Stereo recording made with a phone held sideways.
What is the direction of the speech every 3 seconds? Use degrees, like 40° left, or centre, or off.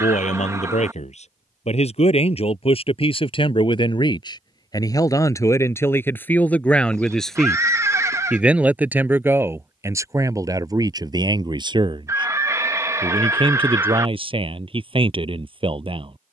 50° left, 30° left, centre, 20° right, 40° right, 40° right.